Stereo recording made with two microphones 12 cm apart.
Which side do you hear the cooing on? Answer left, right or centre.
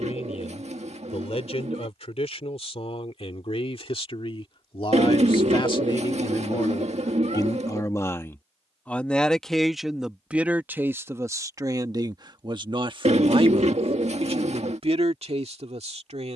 right.